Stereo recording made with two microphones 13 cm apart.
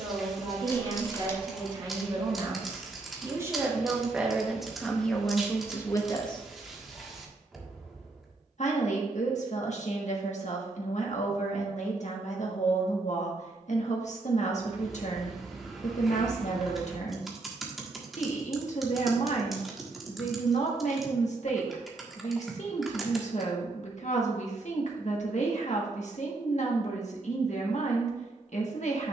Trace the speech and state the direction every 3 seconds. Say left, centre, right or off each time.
right, centre, left, left, left, left, left, left, left, left.